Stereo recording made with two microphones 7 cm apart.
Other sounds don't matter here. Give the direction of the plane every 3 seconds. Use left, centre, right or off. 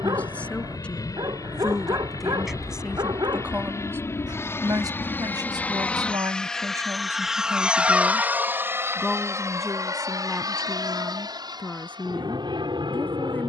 left, left, centre, right, right.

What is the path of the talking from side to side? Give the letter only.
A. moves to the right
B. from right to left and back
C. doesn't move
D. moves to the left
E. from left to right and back
E.